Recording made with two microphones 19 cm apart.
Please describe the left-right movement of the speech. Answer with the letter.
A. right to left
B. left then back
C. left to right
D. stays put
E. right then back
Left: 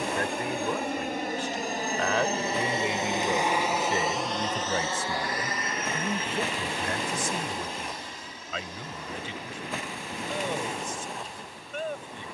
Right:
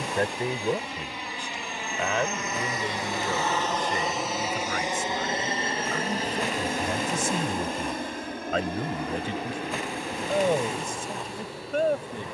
B.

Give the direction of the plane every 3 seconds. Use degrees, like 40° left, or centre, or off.
50° left, 10° right, 50° right, 60° right.